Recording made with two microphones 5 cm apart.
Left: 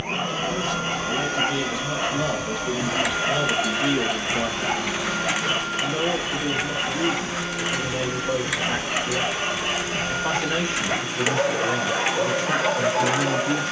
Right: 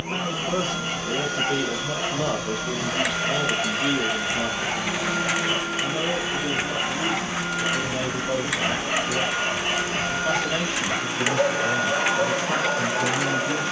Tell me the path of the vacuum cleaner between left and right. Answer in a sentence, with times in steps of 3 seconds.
In this clip you hear the vacuum cleaner on the left from 0 s, in the centre from 3 s and on the right from 6 s.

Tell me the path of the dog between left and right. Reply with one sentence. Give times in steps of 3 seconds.
In this clip you hear the dog on the left from 0 s, in the centre from 6 s and on the left from 12 s.